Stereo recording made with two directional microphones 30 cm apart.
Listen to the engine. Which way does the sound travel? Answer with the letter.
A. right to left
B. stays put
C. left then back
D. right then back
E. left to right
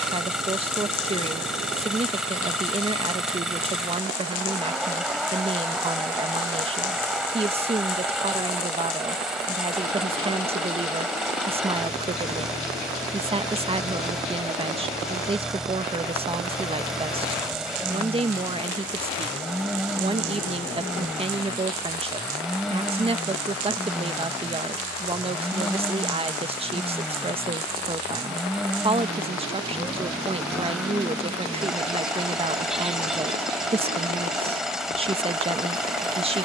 B.